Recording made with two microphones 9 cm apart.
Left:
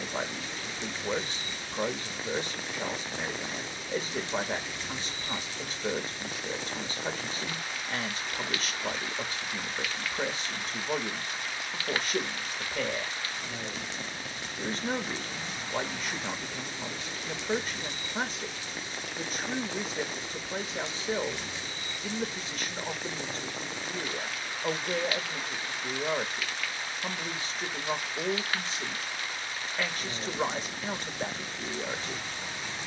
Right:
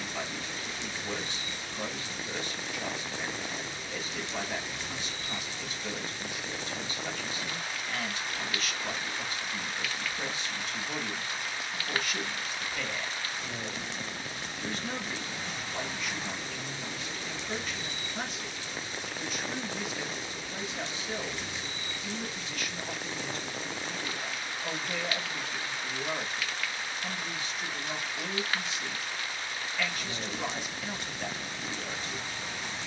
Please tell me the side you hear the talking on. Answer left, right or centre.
left.